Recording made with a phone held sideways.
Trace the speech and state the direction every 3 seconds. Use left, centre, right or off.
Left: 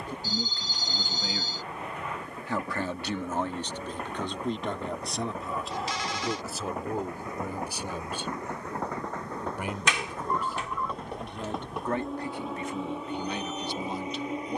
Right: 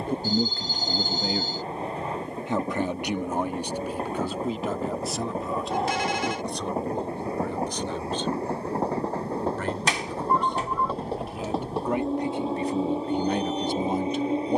right, centre, centre, centre, right.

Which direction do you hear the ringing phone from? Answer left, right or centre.
right.